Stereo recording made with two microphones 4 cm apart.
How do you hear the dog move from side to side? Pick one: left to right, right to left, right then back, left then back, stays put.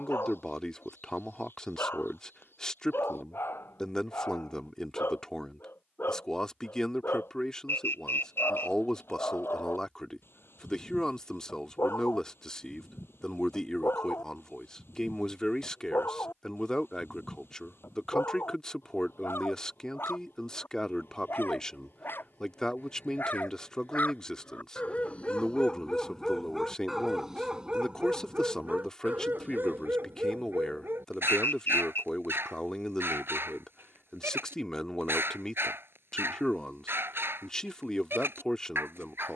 left to right.